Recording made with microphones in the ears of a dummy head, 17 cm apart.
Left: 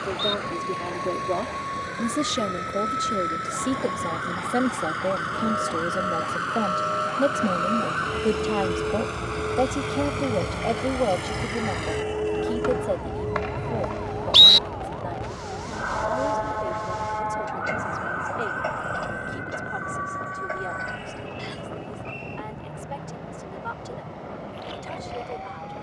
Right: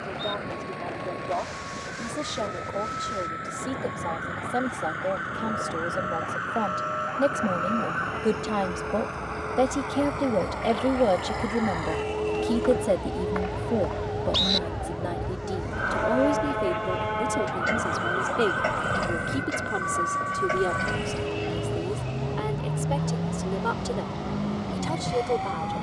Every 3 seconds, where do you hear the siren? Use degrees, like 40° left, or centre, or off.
70° left, 60° left, 50° left, 30° left, centre, 30° right, 50° right, 60° right, 60° right.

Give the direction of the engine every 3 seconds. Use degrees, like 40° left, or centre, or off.
60° left, 60° left, 50° left, 40° left, 30° left, centre, 30° right, 50° right, 60° right.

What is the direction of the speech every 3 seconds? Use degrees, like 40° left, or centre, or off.
40° left, 30° left, 10° left, 10° right, 30° right, 40° right, 50° right, 60° right, 60° right.